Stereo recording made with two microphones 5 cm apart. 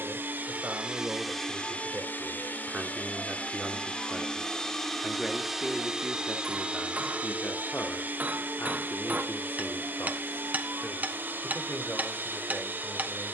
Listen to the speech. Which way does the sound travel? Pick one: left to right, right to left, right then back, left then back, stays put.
right to left.